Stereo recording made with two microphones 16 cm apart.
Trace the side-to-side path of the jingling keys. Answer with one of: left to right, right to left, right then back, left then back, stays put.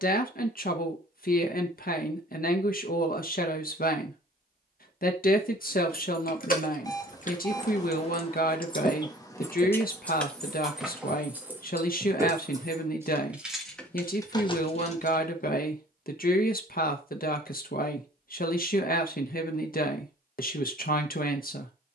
right then back.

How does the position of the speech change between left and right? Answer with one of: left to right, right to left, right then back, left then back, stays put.
stays put.